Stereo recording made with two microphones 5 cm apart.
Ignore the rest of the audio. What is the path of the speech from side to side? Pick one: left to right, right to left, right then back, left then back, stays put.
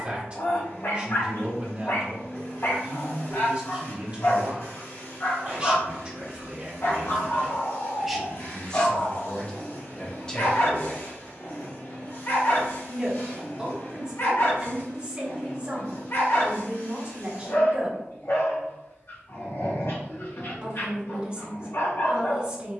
left then back.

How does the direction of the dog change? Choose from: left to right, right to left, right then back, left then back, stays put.
stays put.